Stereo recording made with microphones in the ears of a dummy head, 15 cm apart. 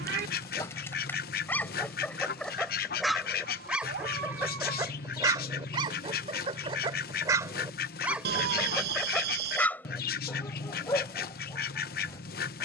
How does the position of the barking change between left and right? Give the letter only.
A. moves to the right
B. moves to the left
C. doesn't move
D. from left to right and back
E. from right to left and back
D.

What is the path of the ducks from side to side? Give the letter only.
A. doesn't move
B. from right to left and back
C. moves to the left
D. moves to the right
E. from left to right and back
A.